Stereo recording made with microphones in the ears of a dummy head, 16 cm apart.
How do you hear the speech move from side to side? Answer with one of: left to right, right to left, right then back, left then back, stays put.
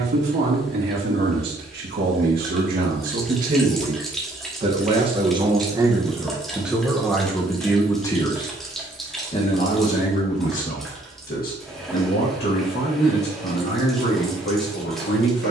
right to left.